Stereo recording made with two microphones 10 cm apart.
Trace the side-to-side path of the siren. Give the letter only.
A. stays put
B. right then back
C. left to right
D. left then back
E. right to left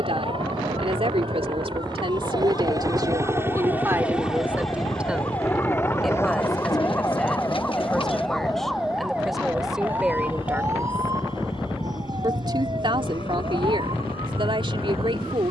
C.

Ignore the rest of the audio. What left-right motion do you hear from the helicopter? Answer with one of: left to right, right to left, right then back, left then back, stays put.
right to left.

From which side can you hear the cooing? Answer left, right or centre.
left.